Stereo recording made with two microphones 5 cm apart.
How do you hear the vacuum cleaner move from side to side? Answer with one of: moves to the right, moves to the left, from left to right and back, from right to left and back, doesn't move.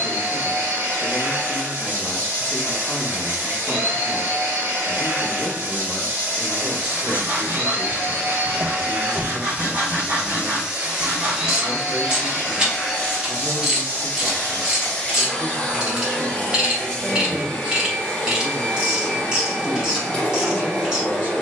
moves to the left.